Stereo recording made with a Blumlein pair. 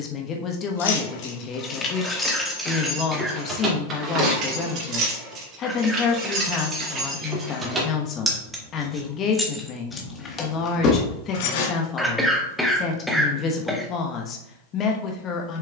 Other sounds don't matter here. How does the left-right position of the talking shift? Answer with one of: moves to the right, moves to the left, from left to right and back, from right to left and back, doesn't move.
doesn't move.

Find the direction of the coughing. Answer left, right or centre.
centre.